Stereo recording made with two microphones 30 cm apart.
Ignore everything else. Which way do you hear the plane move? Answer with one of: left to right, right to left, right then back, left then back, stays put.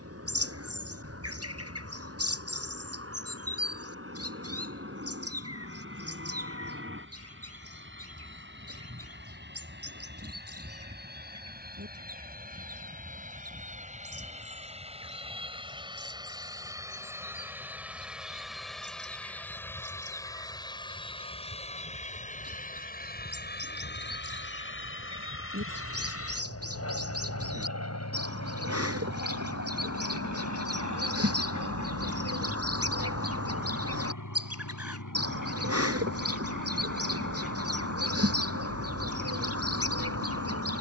right to left.